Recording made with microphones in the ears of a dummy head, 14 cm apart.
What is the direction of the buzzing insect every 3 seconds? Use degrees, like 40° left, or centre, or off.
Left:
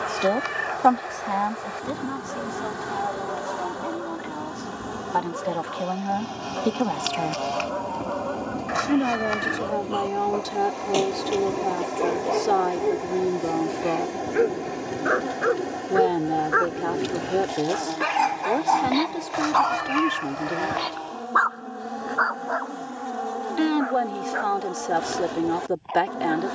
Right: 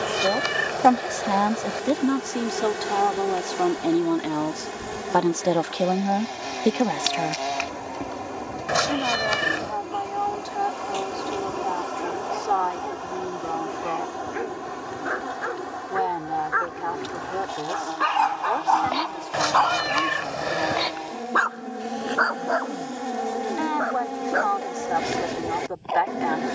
30° right, 20° right, 10° right, centre, 20° left, 30° left, centre, 20° right, 20° right.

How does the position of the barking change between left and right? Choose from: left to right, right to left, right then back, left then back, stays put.
left to right.